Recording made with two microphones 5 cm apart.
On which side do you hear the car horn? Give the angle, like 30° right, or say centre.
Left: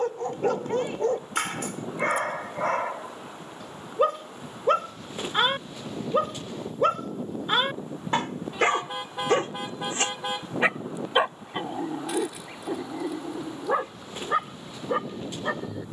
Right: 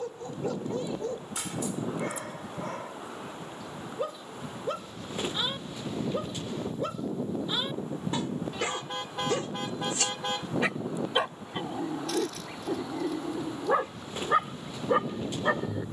10° left.